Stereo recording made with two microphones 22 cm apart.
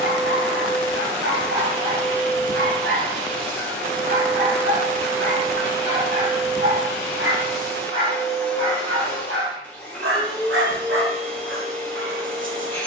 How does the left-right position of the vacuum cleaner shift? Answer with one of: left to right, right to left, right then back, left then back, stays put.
stays put.